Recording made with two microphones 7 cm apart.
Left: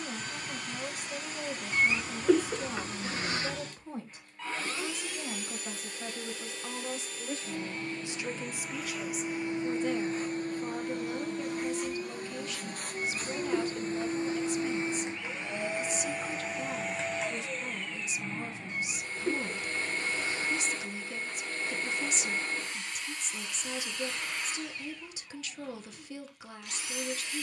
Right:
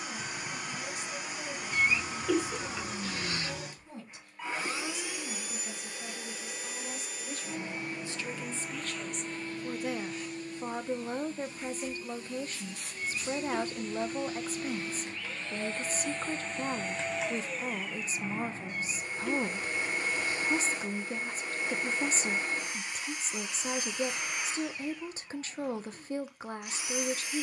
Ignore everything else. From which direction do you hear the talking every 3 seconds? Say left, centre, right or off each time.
left, left, left, right, right, right, right, right, right.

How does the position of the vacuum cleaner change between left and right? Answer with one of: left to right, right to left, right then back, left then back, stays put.
left then back.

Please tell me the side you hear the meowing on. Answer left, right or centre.
left.